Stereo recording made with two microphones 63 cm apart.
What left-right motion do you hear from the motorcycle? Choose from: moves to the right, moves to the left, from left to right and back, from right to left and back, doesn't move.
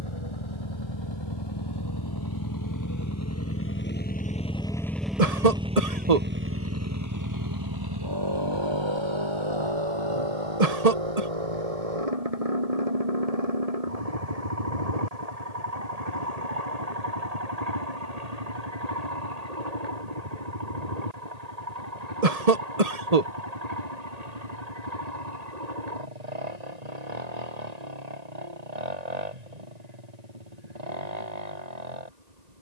moves to the right.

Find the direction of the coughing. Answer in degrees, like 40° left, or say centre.
70° right.